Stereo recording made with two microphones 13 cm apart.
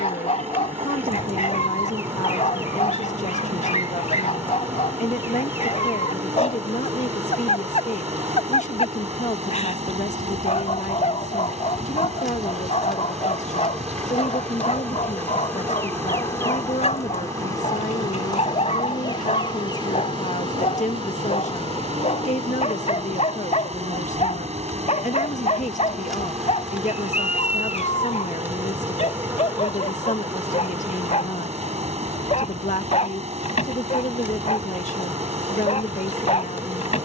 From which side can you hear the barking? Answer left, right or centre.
left.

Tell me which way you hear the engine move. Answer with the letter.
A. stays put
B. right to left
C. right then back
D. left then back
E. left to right
A.